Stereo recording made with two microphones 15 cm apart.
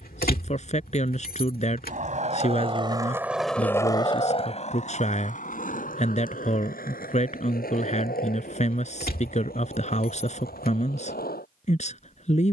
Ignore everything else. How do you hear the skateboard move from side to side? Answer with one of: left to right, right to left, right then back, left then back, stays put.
right to left.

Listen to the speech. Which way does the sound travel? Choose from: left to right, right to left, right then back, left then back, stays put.
stays put.